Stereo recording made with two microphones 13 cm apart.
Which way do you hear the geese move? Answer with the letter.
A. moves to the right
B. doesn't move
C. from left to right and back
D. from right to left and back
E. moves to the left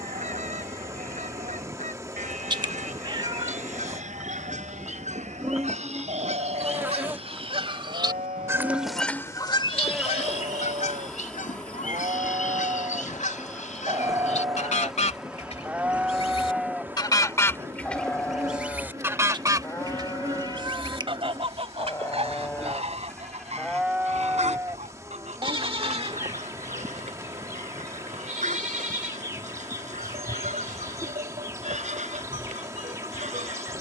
D.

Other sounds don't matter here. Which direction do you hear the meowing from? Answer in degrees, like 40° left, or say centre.
30° right.